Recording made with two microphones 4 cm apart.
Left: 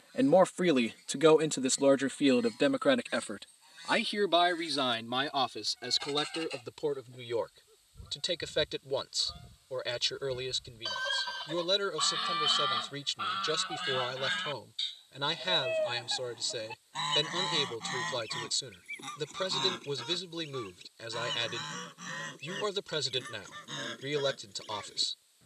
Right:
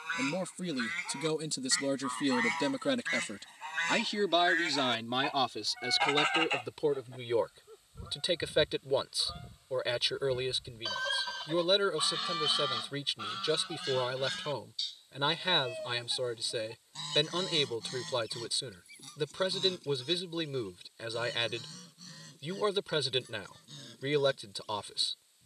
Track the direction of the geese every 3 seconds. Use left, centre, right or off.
right, right, right, centre, left, left, left, left, left.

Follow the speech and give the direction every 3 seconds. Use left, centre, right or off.
left, centre, centre, centre, centre, centre, centre, centre, centre.